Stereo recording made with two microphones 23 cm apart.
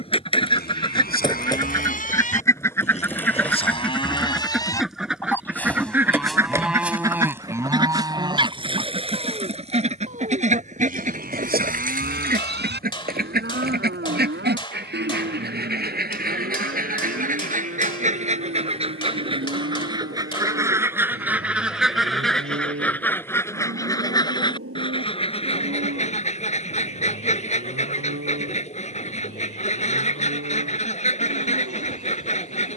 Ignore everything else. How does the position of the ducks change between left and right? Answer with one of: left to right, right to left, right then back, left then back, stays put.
right then back.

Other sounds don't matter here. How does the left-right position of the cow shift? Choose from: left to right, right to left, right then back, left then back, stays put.
left to right.